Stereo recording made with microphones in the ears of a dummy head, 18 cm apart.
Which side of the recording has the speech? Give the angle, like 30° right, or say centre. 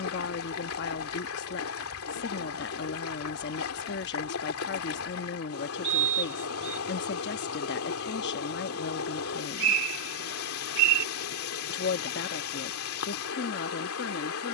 60° left.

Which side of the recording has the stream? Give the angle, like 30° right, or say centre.
80° left.